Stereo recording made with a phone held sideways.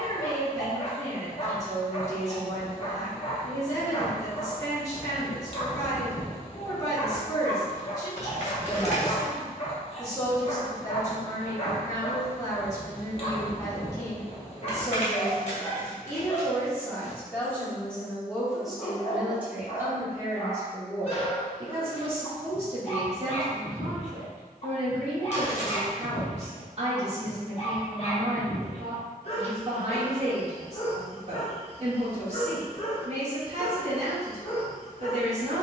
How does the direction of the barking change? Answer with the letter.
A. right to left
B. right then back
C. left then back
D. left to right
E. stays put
E.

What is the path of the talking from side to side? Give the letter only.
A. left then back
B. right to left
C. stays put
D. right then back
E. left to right
E.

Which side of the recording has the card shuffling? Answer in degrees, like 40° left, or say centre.
50° left.